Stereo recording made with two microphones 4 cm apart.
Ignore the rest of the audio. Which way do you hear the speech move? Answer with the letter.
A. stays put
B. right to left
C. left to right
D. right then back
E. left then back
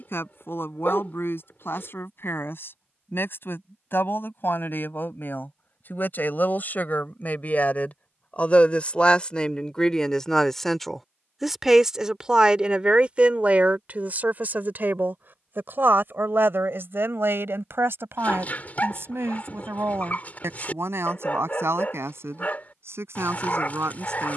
C.